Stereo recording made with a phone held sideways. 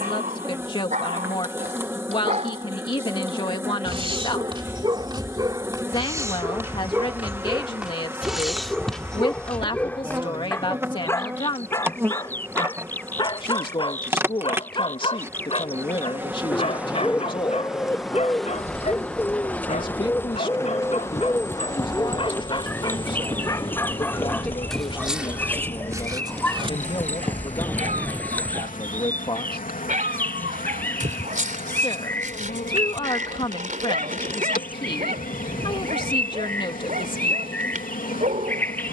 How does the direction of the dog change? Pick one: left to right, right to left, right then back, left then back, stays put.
left then back.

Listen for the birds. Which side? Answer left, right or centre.
centre.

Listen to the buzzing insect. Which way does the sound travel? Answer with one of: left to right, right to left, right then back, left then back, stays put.
right to left.